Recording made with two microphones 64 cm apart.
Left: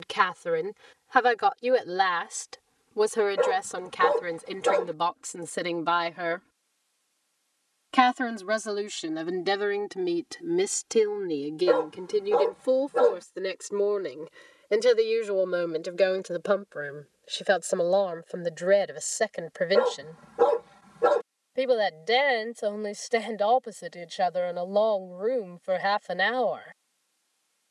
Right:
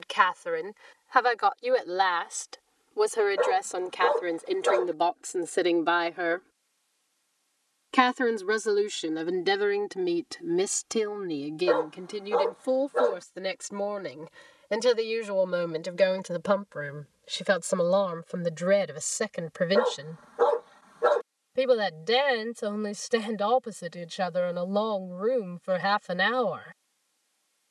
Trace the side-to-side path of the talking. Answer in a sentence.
You can hear the talking move from left to right.